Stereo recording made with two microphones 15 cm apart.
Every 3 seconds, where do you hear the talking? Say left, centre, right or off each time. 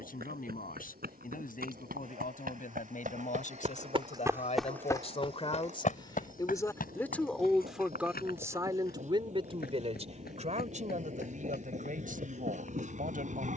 left, left, centre, right, right.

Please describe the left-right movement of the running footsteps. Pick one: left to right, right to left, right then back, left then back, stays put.
right to left.